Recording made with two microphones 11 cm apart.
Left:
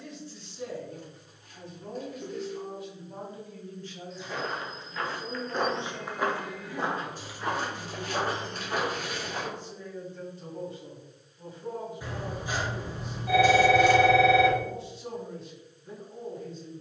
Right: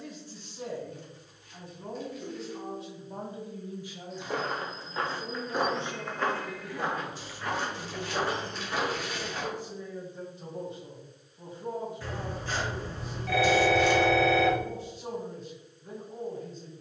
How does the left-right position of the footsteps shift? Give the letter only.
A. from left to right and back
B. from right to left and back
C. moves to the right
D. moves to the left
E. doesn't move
D.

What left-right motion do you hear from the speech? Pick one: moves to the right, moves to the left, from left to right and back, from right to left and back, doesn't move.
from right to left and back.